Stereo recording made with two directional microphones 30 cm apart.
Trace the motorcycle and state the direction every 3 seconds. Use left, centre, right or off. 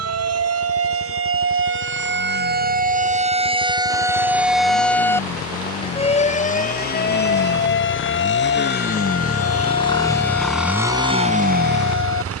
left, left, left, centre.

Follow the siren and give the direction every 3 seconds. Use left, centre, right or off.
right, centre, left, left.